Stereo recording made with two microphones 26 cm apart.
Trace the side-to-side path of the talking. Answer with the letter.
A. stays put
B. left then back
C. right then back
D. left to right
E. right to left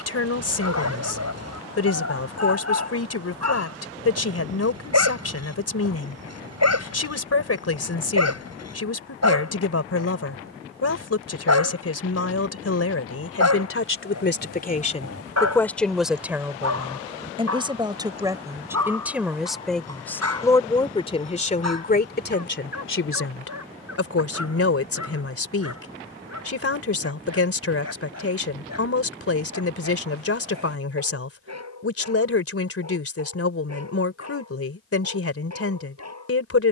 C.